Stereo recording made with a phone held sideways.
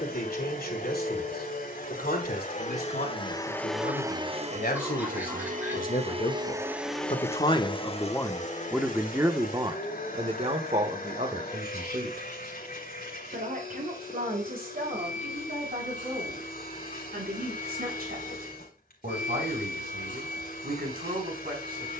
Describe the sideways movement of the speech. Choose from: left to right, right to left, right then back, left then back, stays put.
left to right.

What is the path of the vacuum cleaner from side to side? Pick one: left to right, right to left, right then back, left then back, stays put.
right then back.